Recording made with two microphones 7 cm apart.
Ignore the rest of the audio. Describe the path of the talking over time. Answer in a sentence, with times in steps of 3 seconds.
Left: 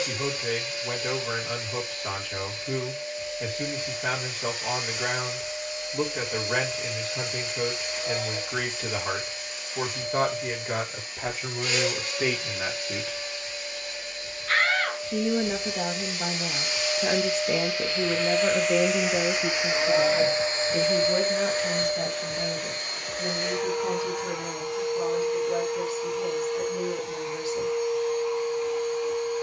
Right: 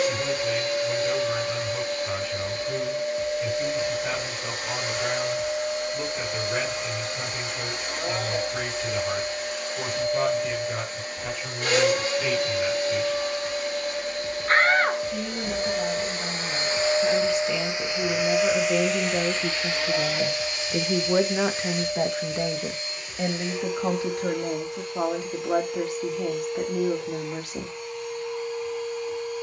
In this clip you hear the talking on the left from 0 s, in the centre from 18 s and on the right from 21 s.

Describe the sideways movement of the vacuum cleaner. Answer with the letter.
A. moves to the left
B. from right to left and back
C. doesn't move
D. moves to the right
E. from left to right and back
A.